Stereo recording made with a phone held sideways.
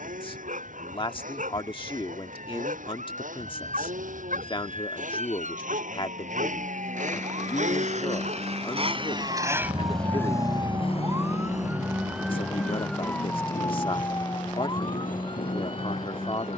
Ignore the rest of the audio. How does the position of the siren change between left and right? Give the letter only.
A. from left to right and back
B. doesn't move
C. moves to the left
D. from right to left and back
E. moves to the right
C.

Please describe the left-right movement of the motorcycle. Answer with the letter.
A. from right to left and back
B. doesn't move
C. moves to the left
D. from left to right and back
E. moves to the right
C.